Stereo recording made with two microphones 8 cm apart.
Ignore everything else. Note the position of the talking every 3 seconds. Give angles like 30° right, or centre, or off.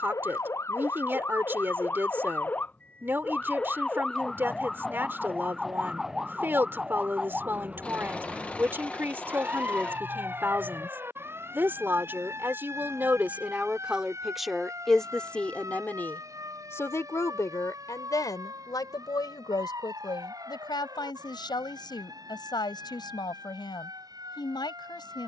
30° right, 30° right, 30° right, 30° right, 10° right, 30° left, 60° left, 70° left, 70° left.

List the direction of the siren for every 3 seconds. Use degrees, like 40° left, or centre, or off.
30° left, 10° left, 10° right, 30° right, 40° right, 40° right, 50° right, 50° right, 50° right.